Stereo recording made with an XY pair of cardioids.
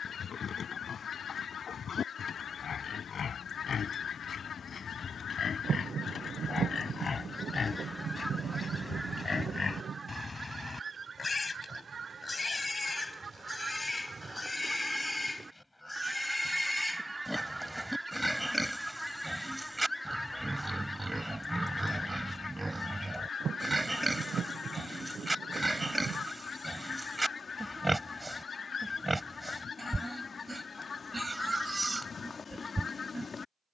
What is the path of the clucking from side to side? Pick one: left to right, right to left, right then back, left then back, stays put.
right then back.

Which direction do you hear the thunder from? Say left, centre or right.
right.